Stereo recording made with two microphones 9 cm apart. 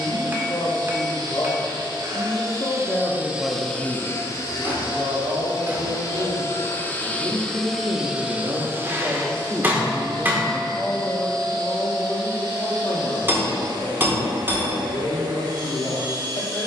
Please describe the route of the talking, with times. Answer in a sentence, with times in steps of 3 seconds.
You can hear the talking on the left from 0 s, on the right from 3 s, in the centre from 9 s and on the left from 12 s.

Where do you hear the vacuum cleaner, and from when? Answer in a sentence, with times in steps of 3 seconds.
In this clip you hear the vacuum cleaner on the right from 0 s, on the left from 3 s, in the centre from 6 s and on the right from 9 s.